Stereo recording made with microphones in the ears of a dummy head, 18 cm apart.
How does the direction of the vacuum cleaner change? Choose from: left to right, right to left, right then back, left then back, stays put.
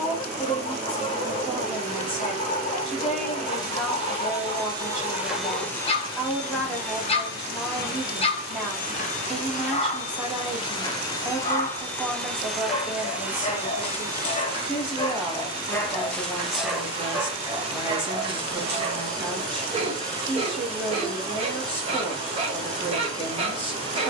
left then back.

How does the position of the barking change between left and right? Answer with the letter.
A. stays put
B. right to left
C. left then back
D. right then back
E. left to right
E.